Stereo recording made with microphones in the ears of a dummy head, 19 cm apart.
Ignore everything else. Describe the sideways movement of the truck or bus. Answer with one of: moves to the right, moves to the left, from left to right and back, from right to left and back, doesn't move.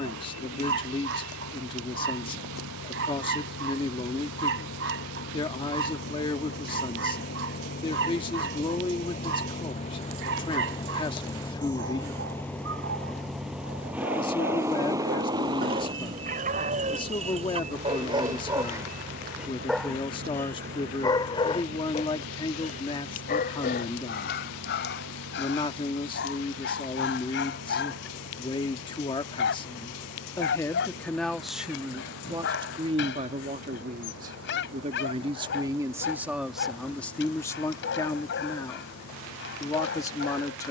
moves to the right.